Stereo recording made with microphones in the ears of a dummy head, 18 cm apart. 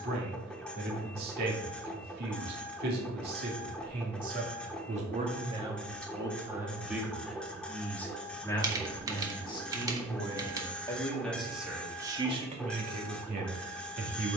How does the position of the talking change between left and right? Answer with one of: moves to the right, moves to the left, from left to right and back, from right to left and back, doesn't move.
from right to left and back.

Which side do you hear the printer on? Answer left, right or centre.
centre.